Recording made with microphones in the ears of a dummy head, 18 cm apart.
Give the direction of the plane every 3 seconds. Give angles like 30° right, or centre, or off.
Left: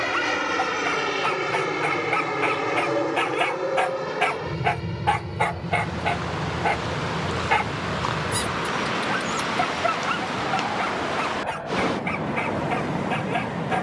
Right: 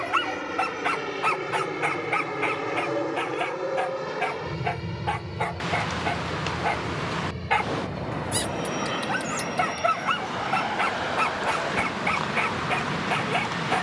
20° left, 10° right, 30° right, 40° right, 50° right.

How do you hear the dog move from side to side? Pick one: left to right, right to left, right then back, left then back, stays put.
left then back.